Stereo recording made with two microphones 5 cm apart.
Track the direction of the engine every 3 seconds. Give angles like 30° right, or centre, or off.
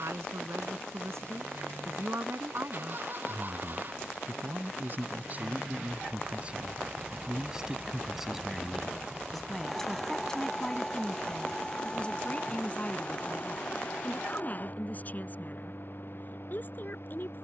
50° right, 40° right, 20° right, 10° left, 30° left, 50° left.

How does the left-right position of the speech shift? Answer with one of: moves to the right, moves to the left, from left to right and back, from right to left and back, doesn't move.
moves to the left.